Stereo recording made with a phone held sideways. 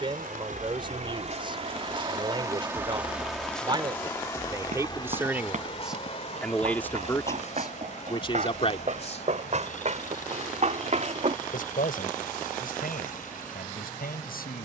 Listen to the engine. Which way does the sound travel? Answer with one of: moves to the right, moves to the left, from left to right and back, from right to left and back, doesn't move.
moves to the left.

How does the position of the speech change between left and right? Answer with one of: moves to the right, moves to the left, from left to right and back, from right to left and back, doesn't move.
moves to the left.